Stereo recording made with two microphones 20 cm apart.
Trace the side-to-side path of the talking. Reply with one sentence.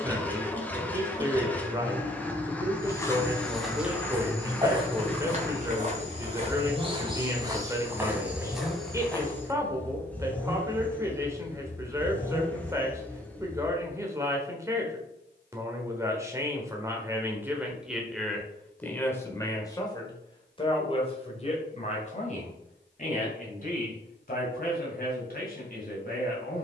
You can hear the talking move to the left.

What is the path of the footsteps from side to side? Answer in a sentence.
You can hear the footsteps move from left to right and back again.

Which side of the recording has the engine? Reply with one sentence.
In this clip you hear the engine in the centre.